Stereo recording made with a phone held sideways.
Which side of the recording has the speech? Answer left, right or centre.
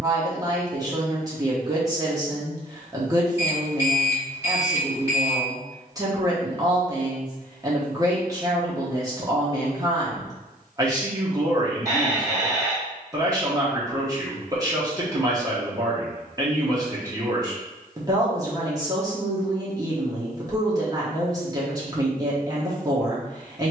right.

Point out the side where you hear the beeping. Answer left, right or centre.
right.